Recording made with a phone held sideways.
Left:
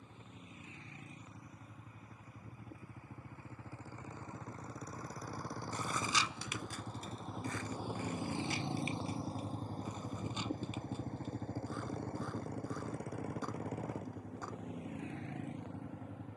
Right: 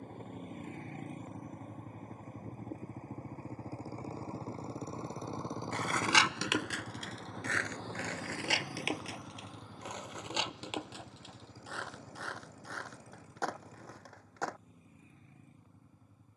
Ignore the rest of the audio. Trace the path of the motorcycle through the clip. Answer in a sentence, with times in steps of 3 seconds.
You can hear the motorcycle on the right from 0 s, in the centre from 6 s and on the left from 9 s.